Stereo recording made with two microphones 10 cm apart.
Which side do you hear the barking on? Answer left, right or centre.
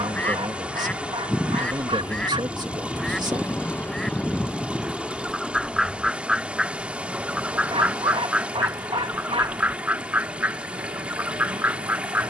right.